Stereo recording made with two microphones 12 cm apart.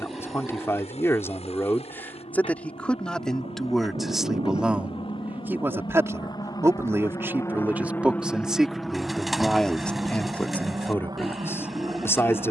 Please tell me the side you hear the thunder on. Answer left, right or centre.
right.